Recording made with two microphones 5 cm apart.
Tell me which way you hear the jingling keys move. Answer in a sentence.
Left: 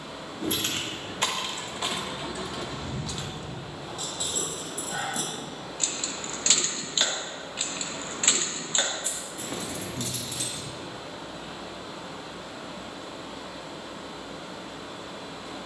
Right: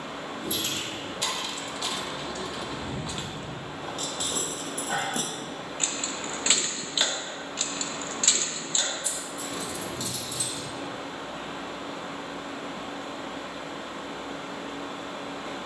You can hear the jingling keys move from left to right and back again.